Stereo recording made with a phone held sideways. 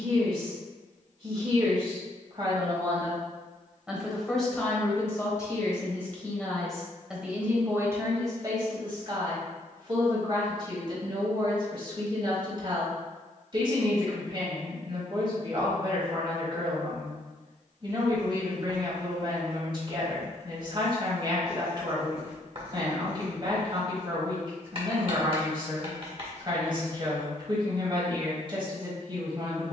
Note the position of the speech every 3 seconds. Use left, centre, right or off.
right, centre, centre, right, right, right, right, right, right, right.